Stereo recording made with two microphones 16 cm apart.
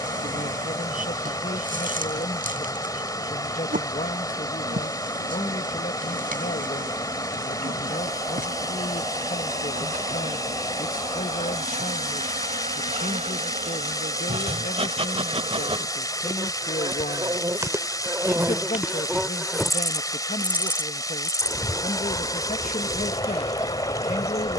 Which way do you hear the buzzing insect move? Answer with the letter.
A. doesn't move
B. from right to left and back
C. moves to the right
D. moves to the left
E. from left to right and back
D.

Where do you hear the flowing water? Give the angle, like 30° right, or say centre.
20° left.